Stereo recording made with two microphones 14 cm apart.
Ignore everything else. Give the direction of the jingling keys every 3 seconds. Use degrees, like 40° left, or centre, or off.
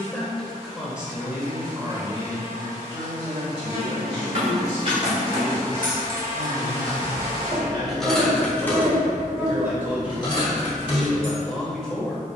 off, 50° right, centre, 30° left.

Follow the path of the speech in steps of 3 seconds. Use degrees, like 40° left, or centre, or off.
20° right, 50° right, 30° right, 10° right.